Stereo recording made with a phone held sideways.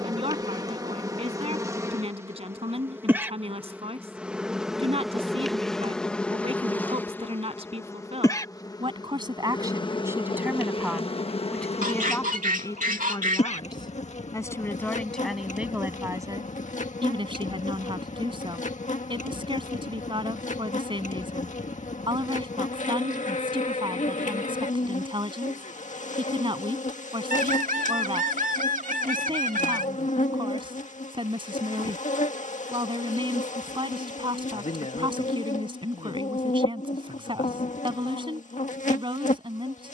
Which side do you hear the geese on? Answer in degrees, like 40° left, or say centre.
70° right.